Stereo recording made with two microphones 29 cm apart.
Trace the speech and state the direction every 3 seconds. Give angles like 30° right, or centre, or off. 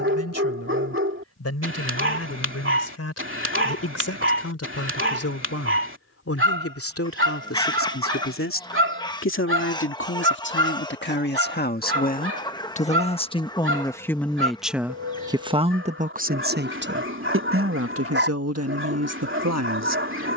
60° left, 60° left, 50° left, 40° left, 10° left, 40° right, 70° right.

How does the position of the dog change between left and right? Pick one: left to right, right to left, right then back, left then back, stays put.
stays put.